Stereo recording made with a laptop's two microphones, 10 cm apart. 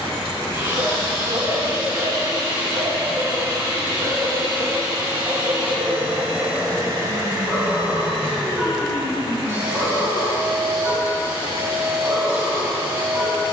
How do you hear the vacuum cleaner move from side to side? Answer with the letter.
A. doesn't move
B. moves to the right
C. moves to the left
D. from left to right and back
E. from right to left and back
A.